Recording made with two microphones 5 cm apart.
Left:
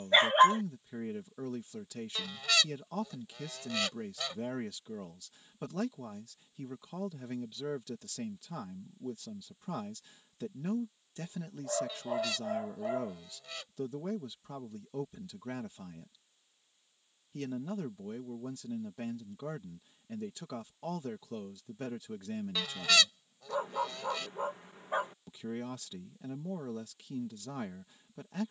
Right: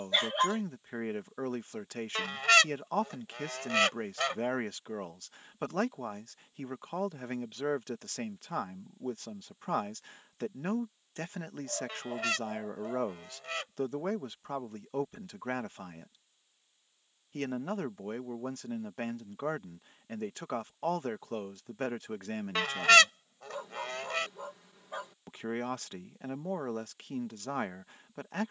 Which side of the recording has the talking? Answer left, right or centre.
right.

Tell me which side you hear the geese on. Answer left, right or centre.
right.